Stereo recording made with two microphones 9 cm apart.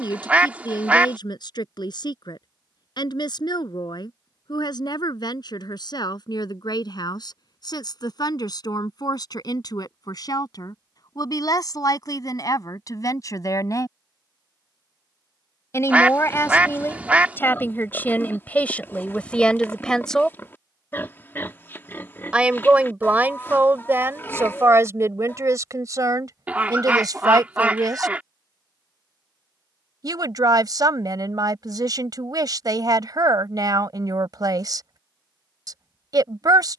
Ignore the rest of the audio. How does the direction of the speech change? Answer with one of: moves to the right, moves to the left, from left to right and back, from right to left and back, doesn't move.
moves to the right.